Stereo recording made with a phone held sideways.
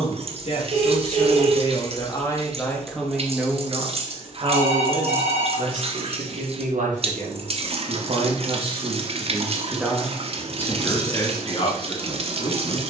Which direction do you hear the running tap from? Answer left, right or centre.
right.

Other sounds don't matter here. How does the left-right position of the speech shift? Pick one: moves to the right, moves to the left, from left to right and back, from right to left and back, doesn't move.
from left to right and back.